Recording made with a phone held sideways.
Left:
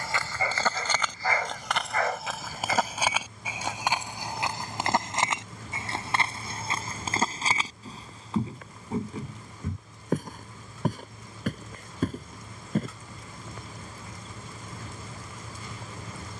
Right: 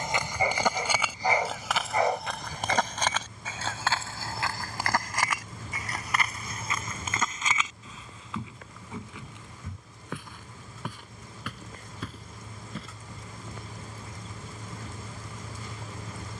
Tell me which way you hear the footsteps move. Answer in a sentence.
You can hear the footsteps move to the left.